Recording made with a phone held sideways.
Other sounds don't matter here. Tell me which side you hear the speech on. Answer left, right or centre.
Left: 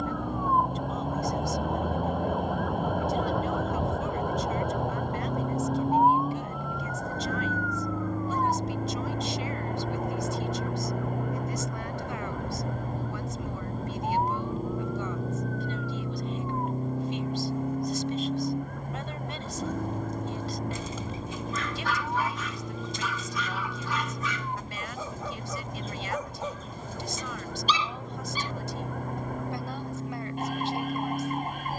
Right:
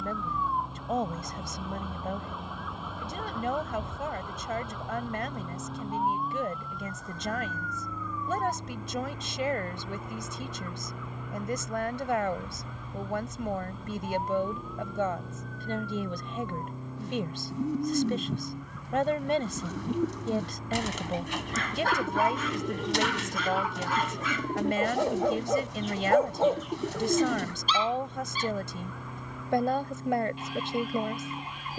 right.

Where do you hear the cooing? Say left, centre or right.
right.